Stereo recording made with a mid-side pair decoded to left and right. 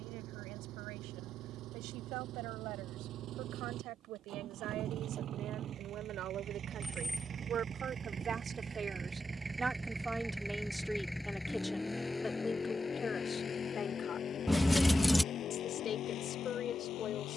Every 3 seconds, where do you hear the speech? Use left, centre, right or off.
right, right, right, centre, left, left.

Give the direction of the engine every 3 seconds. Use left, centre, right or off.
right, right, right, centre, left, left.